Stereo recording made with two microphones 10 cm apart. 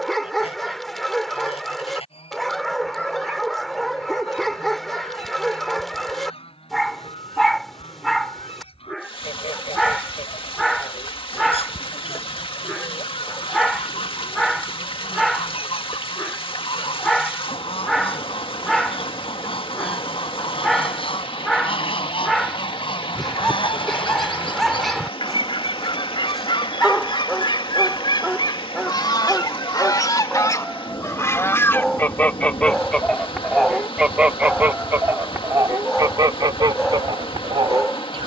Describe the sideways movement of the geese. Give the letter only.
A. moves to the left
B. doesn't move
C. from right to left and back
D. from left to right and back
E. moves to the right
E.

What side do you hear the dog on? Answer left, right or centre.
centre.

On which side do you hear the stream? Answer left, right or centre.
left.